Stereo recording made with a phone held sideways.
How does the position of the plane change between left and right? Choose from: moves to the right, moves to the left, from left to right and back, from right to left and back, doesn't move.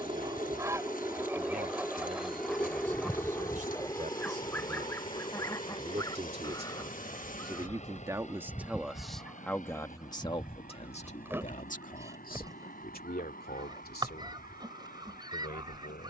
moves to the left.